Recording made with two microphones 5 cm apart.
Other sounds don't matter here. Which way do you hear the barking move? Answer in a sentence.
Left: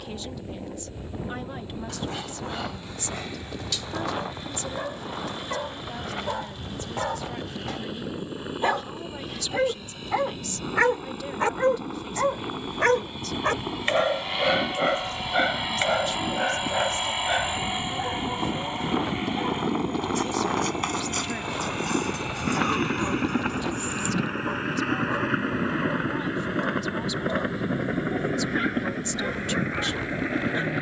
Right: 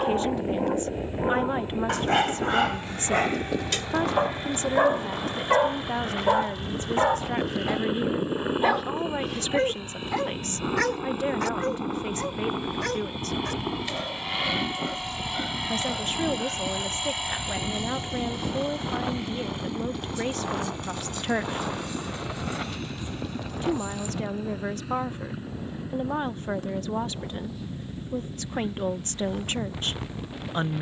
You can hear the barking go from the right side to the left.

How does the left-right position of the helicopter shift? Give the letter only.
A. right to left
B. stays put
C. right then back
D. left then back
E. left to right
A.